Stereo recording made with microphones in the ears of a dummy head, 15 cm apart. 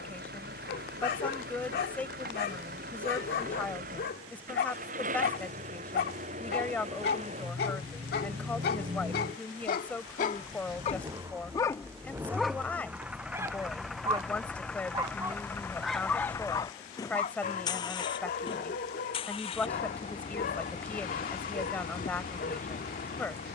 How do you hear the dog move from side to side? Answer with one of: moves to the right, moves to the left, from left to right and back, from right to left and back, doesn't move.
from left to right and back.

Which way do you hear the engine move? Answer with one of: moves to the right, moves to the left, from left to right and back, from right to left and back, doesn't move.
moves to the left.